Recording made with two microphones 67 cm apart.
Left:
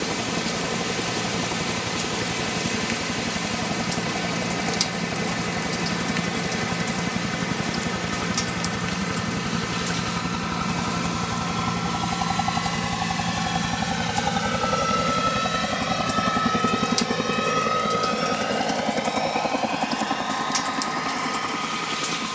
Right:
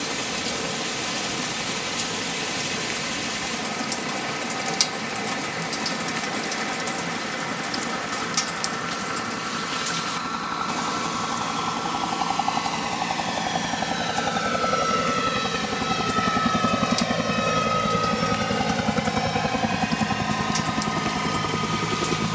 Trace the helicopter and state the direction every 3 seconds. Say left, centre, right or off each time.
left, left, left, left, left, centre, right, right.